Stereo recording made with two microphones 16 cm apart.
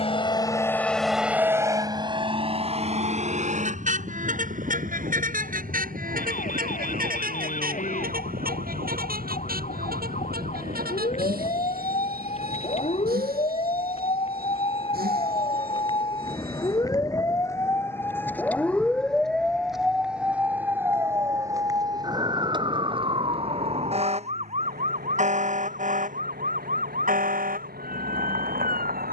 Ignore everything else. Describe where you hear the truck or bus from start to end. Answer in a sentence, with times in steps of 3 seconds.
In this clip you hear the truck or bus in the centre from 0 s and on the right from 3 s.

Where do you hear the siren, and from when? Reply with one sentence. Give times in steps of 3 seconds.
You can hear the siren on the left from 0 s, in the centre from 18 s and on the right from 21 s.